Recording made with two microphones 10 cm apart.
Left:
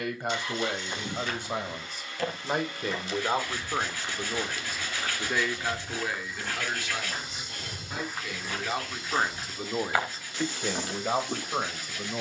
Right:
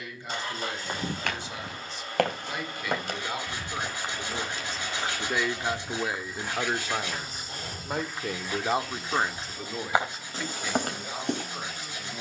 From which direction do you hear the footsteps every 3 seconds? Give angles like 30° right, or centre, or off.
70° right, 30° right, centre, 40° right.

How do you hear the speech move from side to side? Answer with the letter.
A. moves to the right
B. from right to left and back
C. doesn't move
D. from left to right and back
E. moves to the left
D.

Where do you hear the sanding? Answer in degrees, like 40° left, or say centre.
20° right.